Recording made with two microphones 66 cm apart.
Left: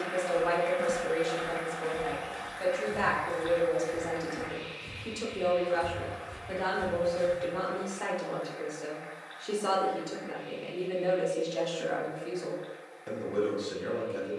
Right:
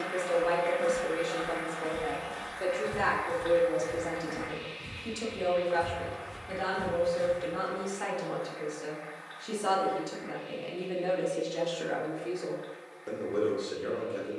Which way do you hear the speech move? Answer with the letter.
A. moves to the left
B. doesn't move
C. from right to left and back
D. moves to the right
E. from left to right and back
E.